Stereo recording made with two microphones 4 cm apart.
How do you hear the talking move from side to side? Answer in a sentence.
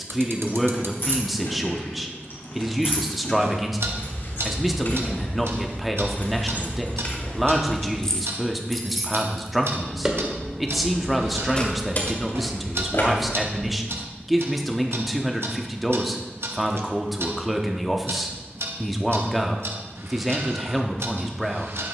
You can hear the talking stay put.